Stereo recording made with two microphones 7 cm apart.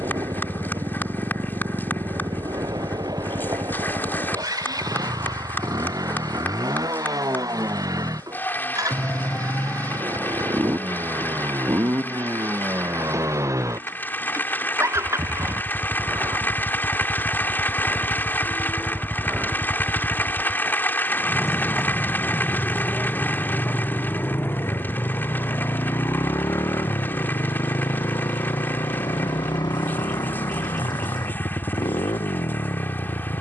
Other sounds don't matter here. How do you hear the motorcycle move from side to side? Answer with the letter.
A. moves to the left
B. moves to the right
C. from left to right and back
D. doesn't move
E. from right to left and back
A.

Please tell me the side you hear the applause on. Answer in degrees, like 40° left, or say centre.
30° left.